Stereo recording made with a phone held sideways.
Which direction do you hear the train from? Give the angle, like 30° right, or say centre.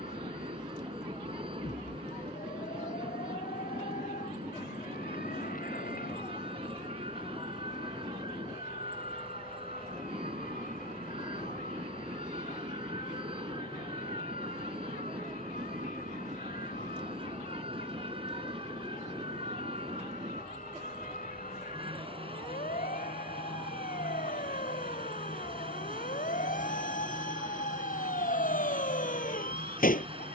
40° right.